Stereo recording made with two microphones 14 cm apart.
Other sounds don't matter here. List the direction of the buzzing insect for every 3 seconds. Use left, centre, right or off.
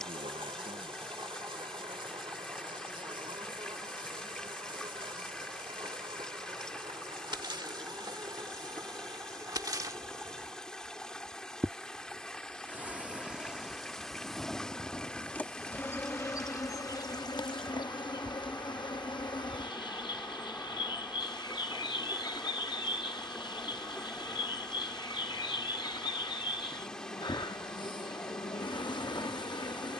right, right, right, right, centre, left, left, left, left, left.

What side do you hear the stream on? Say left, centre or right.
centre.